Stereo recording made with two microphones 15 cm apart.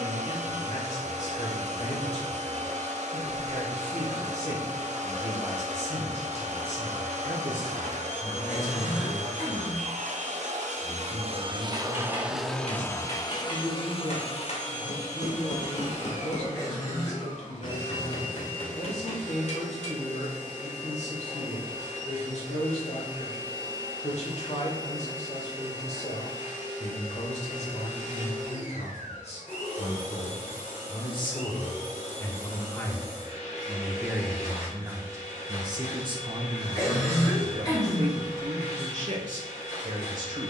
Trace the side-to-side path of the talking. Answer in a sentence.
In this clip you hear the talking go from the left side to the right.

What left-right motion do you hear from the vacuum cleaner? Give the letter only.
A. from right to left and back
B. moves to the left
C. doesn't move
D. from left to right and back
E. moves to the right
B.